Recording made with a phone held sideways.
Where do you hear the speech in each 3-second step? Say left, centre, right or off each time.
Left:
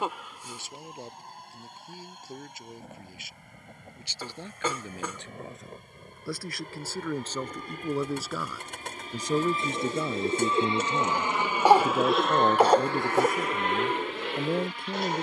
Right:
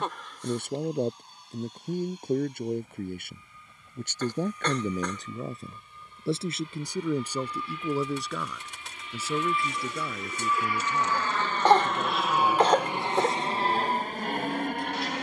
right, right, centre, left, left.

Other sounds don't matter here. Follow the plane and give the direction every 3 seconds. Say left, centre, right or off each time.
left, left, left, left, right.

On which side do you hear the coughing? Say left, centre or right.
centre.